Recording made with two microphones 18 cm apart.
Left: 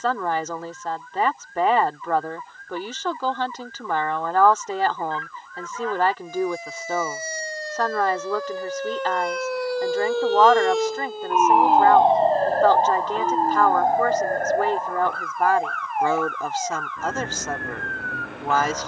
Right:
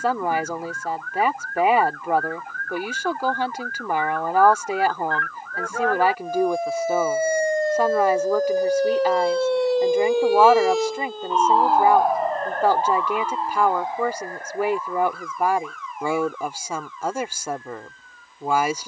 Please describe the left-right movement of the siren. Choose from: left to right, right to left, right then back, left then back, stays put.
right to left.